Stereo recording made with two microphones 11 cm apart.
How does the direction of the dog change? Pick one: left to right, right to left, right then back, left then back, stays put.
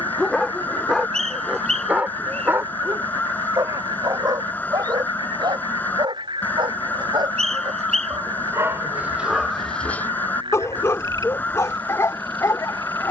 right then back.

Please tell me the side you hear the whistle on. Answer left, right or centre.
right.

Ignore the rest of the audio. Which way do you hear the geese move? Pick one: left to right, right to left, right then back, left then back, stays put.
stays put.